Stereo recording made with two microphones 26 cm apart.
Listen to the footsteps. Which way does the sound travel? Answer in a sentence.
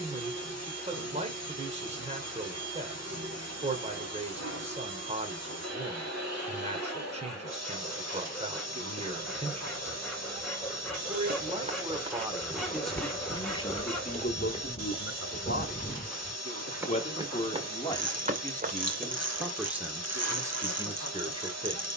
You can hear the footsteps go left and come back.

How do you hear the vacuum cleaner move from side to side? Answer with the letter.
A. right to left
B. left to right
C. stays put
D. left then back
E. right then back
C.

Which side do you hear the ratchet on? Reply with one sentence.
In this clip you hear the ratchet on the right.